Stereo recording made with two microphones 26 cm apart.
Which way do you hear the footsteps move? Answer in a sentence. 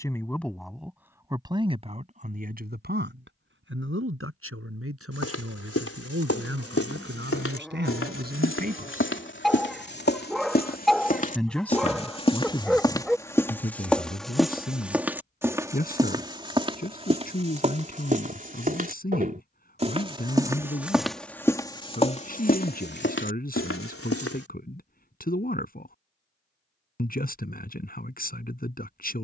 In this clip you hear the footsteps move from left to right and back again.